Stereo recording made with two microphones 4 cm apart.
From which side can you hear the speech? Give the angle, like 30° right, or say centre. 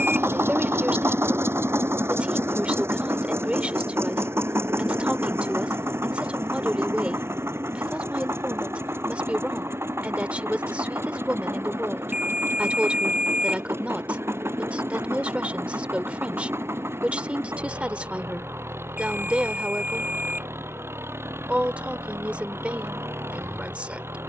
30° right.